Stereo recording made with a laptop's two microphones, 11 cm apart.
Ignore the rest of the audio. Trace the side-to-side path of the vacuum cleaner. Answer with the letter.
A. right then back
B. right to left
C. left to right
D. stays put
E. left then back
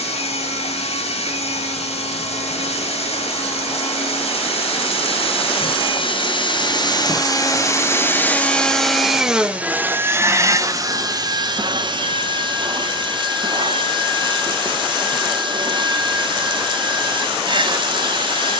C.